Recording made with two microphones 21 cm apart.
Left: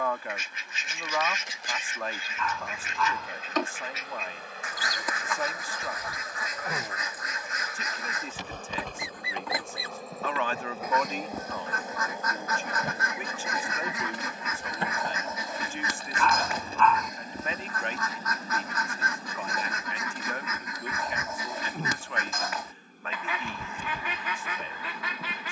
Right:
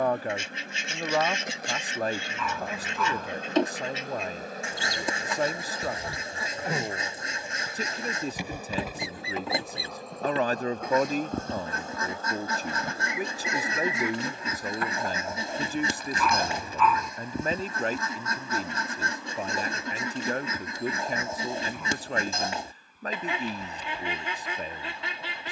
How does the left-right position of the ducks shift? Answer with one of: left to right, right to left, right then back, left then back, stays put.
stays put.